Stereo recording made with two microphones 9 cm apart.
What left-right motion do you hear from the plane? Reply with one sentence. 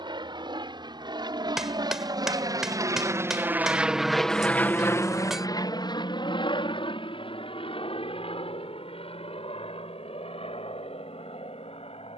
In this clip you hear the plane move to the left.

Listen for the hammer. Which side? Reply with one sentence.
In this clip you hear the hammer in the centre.